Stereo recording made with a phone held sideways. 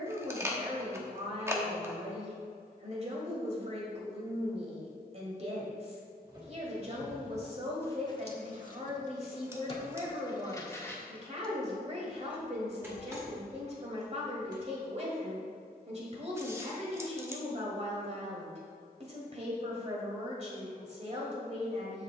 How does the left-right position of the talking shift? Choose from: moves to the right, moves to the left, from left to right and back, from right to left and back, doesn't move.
doesn't move.